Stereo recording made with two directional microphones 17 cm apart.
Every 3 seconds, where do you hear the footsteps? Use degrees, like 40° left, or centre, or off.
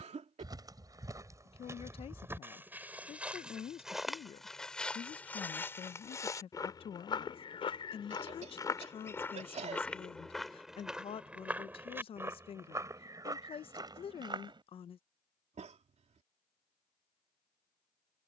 20° right, centre, 20° left, centre, 20° right, off.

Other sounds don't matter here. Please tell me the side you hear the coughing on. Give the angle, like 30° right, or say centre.
40° right.